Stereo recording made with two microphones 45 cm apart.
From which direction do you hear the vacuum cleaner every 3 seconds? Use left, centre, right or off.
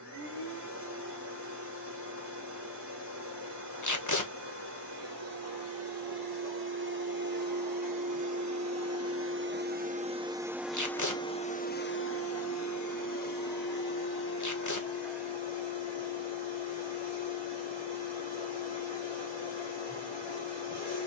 right, right, right, centre, left, left, left.